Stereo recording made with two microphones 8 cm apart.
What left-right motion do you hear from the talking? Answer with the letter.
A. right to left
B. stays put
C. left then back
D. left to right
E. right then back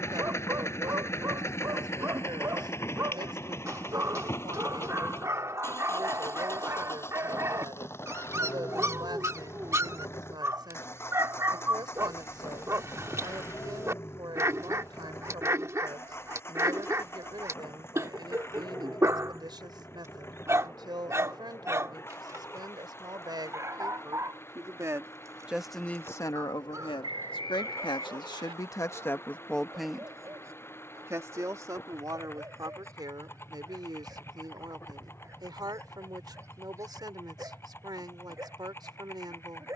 C.